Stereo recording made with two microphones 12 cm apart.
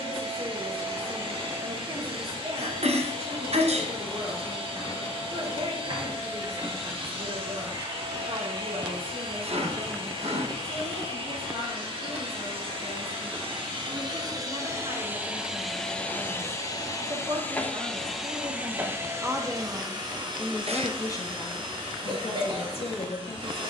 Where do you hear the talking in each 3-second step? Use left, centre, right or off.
right, right, right, right, right, right, centre, left.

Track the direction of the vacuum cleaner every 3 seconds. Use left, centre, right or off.
right, right, right, right, right, centre, right, right.